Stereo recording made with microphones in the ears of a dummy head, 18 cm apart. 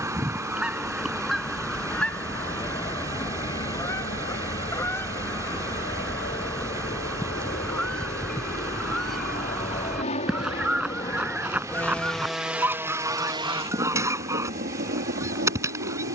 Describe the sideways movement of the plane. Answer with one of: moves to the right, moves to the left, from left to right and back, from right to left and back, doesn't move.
moves to the right.